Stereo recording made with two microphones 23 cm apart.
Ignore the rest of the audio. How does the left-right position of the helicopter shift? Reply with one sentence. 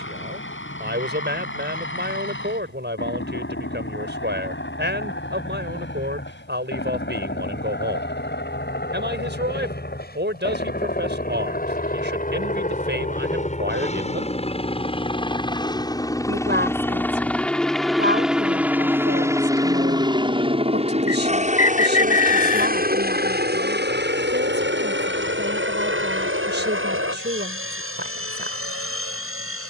In this clip you hear the helicopter go from the left side to the right.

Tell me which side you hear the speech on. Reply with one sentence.
You can hear the speech on the right.